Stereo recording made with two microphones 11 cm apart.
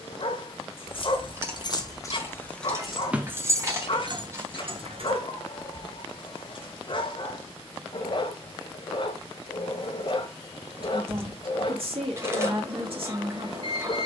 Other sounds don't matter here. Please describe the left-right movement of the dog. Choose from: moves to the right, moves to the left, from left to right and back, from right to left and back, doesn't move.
doesn't move.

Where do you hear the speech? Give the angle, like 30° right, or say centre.
50° right.